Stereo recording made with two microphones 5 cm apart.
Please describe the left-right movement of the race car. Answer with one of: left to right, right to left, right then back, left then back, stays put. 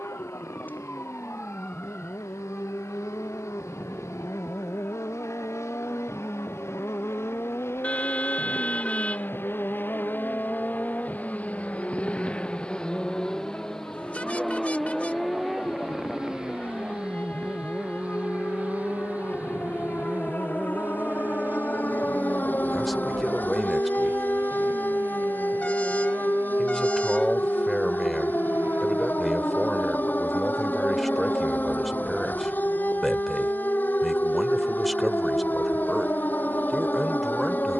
left to right.